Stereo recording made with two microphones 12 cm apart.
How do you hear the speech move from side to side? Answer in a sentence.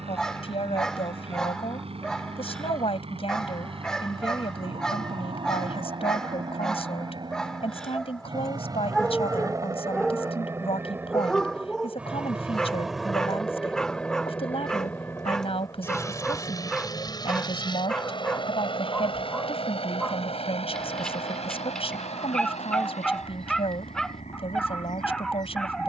You can hear the speech stay in one place.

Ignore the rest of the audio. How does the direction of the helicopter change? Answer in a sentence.
You can hear the helicopter go from the right side to the left.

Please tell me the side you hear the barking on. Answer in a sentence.
In this clip you hear the barking in the centre.